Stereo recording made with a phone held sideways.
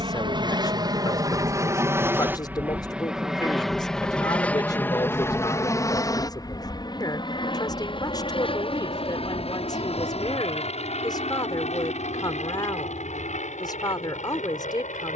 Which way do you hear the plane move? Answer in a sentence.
You can hear the plane go from the right side to the left.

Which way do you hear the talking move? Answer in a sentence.
In this clip you hear the talking stay put.